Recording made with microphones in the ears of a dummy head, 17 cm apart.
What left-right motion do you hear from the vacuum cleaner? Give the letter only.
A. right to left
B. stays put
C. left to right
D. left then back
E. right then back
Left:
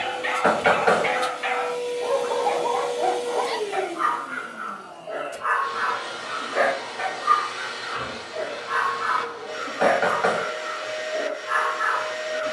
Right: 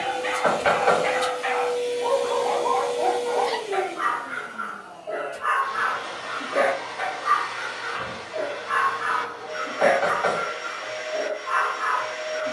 A.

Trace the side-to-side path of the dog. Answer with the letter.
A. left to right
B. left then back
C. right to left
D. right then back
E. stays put
D.